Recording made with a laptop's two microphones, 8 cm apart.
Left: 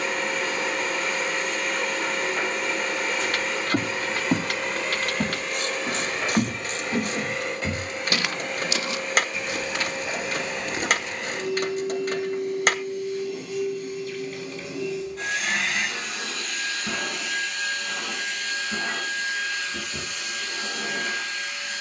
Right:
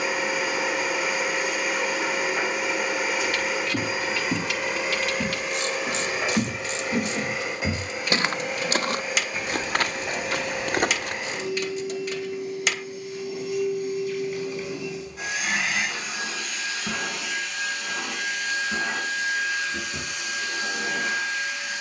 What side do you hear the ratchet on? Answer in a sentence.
In this clip you hear the ratchet on the left.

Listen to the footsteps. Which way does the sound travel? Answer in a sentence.
You can hear the footsteps go from the left side to the right.